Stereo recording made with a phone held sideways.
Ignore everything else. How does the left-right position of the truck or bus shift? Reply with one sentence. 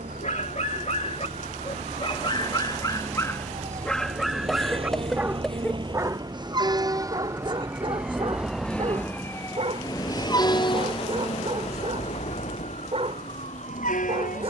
You can hear the truck or bus move from right to left.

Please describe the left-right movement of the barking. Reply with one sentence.
In this clip you hear the barking move from left to right.